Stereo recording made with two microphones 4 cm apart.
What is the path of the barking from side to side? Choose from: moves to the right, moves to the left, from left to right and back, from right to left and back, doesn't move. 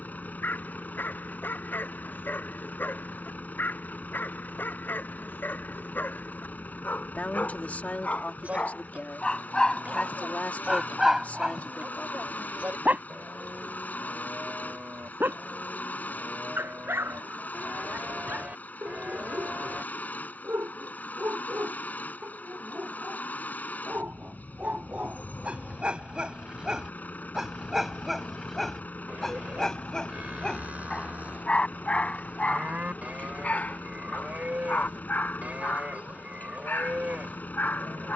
from left to right and back.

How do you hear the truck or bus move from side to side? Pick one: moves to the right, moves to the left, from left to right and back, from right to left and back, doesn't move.
doesn't move.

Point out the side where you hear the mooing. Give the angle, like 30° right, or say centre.
40° right.